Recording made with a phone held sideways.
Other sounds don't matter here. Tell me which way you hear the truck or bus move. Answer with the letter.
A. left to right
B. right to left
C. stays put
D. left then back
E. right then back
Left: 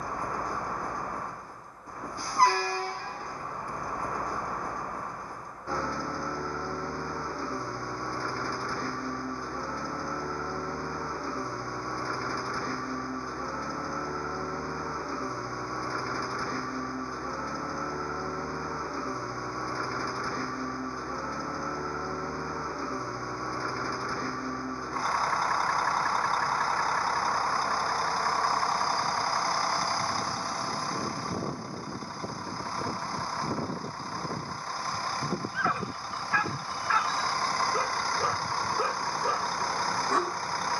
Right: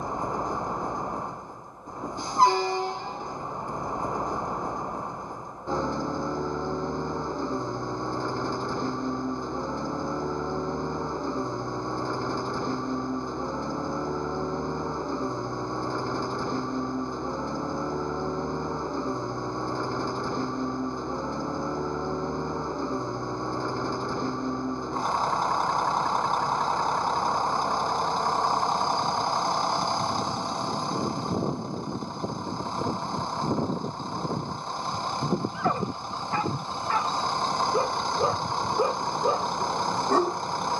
C.